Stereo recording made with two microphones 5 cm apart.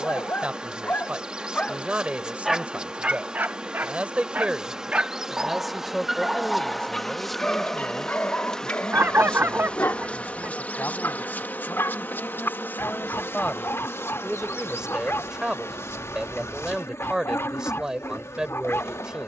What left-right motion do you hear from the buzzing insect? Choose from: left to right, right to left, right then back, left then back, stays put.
right to left.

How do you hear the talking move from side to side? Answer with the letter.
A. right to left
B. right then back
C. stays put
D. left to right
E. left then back
E.